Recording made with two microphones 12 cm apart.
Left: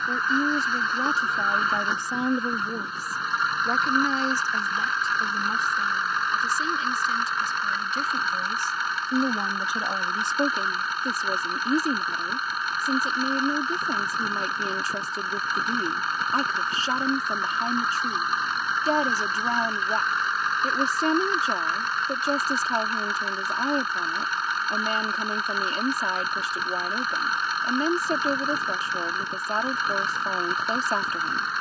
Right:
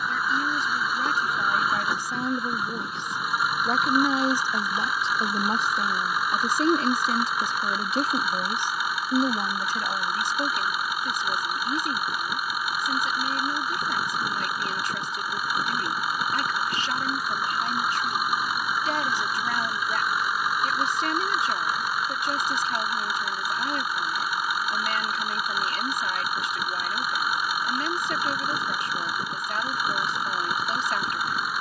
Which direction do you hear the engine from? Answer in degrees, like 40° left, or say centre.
10° right.